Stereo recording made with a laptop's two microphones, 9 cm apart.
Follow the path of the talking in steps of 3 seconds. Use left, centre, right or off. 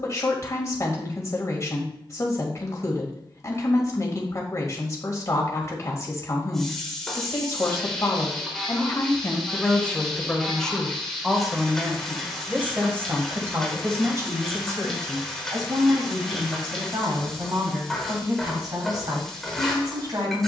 left, left, left, centre, right, right, right.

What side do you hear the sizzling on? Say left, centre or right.
centre.